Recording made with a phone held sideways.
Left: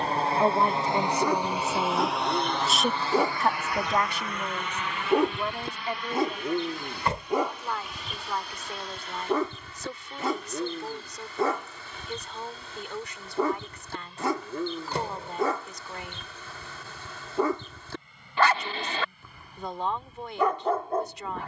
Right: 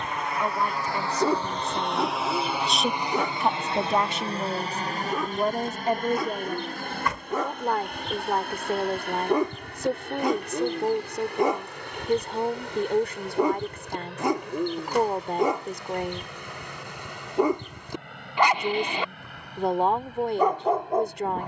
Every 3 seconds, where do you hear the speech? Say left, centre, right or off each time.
left, right, right, right, right, right, right.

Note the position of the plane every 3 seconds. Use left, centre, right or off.
centre, right, right, right, right, right, right.